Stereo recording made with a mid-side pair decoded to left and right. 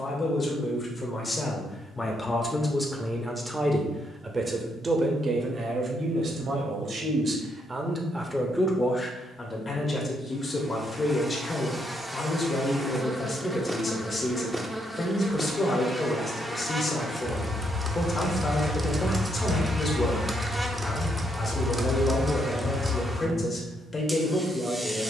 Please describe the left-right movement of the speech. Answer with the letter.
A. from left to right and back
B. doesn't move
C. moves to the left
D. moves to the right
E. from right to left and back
A.